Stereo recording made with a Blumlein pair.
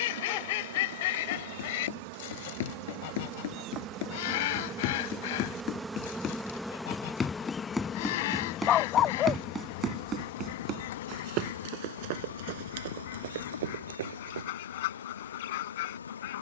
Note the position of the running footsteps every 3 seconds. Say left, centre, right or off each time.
left, left, centre, right, right, off.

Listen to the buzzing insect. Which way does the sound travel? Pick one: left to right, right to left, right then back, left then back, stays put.
right to left.